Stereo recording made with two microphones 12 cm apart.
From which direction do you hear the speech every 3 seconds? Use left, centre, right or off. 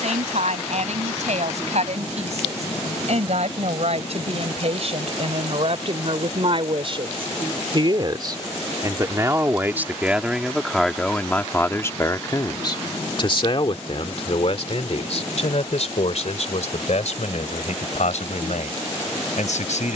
right, right, right, centre, left, left, left.